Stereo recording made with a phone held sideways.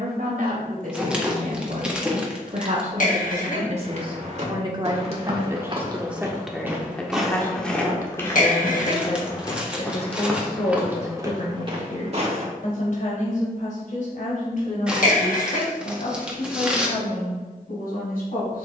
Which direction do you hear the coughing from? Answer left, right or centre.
left.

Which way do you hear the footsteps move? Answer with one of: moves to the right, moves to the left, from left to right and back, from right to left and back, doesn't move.
from right to left and back.